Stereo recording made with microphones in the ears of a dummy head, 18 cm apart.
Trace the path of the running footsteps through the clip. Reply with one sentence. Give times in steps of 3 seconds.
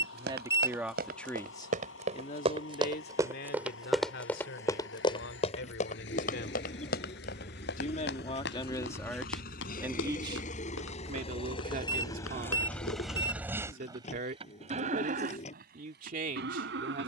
You can hear the running footsteps on the right from 0 s, in the centre from 3 s, on the left from 6 s and not at all from 15 s.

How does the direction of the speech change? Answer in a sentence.
You can hear the speech go left and come back.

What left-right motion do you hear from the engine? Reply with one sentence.
You can hear the engine move from left to right.